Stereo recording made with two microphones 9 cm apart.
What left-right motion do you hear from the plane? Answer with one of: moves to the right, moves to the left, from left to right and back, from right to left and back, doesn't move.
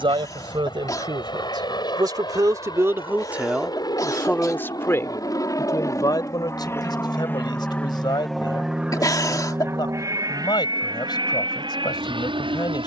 moves to the right.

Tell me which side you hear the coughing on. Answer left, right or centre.
left.